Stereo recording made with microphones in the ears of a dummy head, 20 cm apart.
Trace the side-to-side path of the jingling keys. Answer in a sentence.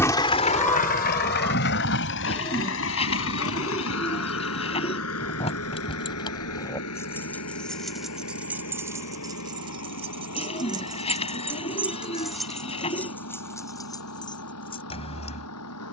In this clip you hear the jingling keys go right and come back.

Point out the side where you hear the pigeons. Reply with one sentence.
In this clip you hear the pigeons on the left.